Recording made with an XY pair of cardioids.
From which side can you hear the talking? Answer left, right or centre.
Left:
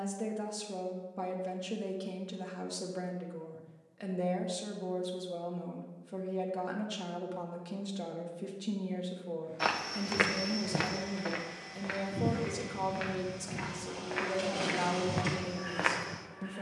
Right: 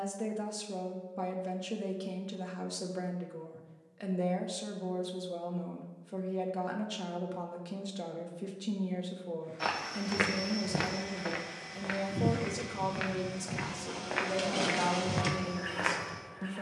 centre.